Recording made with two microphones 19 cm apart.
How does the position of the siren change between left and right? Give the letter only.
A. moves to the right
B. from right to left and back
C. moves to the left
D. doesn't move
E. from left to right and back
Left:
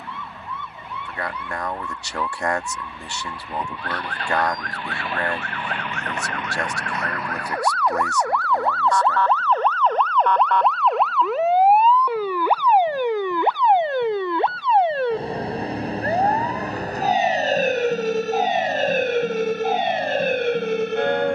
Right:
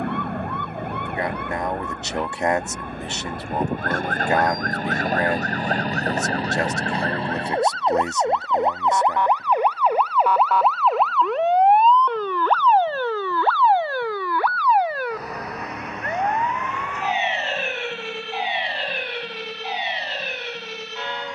C.